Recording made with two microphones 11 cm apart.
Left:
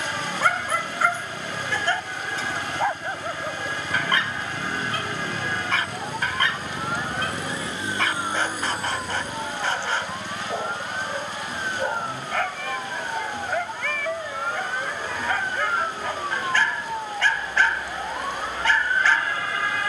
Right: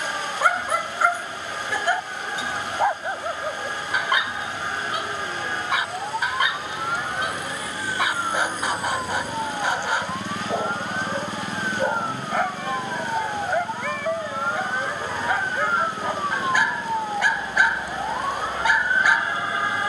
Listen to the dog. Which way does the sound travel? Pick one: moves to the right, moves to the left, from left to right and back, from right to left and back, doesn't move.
doesn't move.